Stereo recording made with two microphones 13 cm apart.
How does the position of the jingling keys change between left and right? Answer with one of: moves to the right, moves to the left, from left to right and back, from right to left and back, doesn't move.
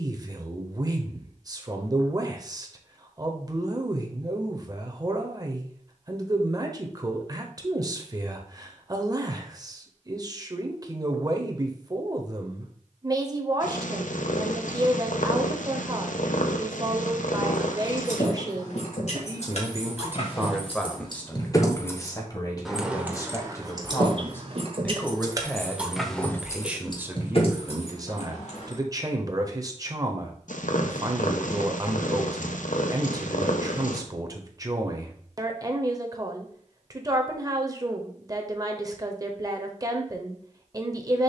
from left to right and back.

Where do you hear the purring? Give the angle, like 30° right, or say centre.
80° left.